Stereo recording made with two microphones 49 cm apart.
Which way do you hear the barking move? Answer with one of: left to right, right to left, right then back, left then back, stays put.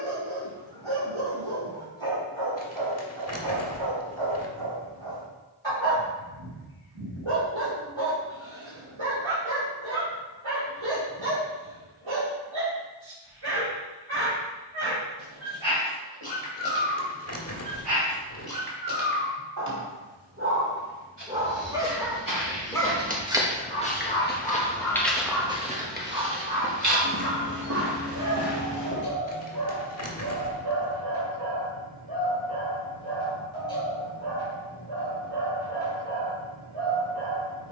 left then back.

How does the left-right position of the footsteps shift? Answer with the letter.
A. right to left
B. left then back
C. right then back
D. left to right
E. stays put
B.